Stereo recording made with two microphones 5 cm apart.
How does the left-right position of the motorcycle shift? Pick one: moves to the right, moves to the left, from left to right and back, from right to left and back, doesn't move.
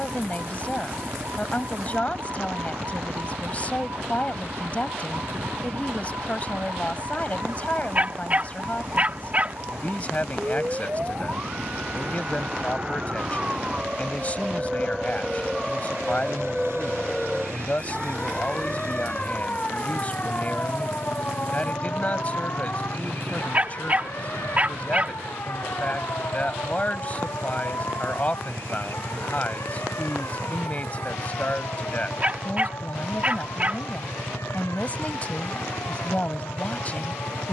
doesn't move.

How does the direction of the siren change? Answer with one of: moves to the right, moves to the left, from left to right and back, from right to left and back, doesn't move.
moves to the left.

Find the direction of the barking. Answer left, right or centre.
right.